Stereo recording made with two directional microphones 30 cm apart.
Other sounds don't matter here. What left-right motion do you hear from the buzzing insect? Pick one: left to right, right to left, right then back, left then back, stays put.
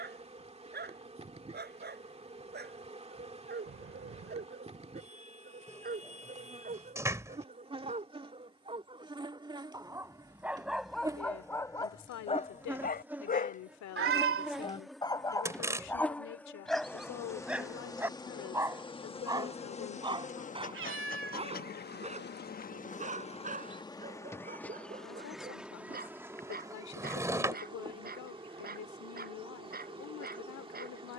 left then back.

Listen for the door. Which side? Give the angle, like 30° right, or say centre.
10° right.